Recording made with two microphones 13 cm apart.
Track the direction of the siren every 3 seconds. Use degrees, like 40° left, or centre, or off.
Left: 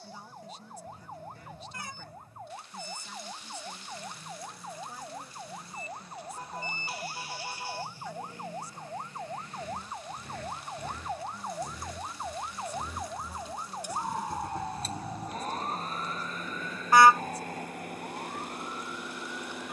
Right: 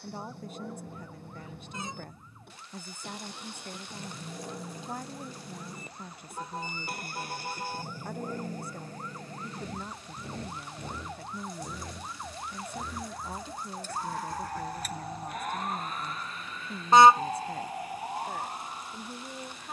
60° left, 60° left, 50° left, 40° left, 10° left, 20° right, 40° right.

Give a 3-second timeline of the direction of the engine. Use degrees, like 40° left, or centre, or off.
70° right, 60° right, 50° right, 30° right, 10° left, 40° left, 60° left.